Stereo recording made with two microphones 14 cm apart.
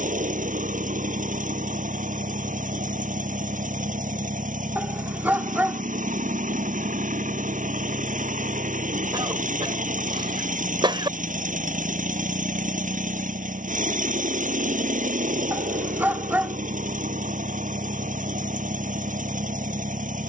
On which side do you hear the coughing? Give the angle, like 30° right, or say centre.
30° right.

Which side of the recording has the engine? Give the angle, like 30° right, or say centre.
60° right.